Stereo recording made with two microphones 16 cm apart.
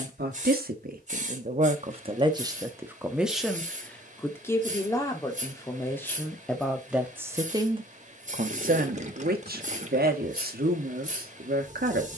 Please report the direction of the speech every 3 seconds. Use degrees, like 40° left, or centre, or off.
50° right, 10° left, 20° right, 70° right.